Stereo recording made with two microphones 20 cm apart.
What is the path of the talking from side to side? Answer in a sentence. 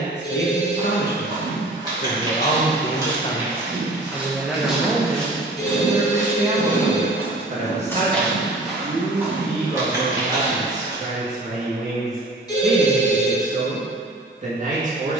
In this clip you hear the talking travel towards the right.